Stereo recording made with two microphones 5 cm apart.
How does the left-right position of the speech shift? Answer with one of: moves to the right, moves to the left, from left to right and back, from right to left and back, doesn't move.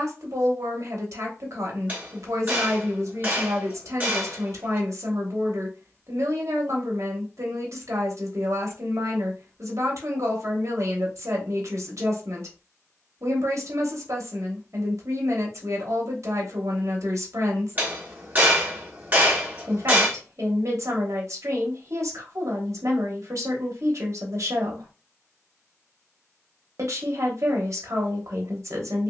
doesn't move.